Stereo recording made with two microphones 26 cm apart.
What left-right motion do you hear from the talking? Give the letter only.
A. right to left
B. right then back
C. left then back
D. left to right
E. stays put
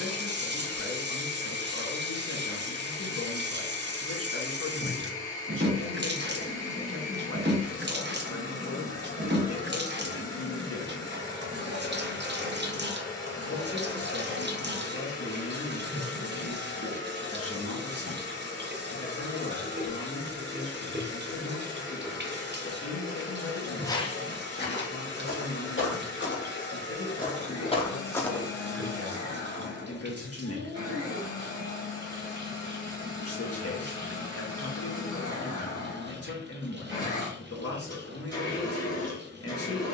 E.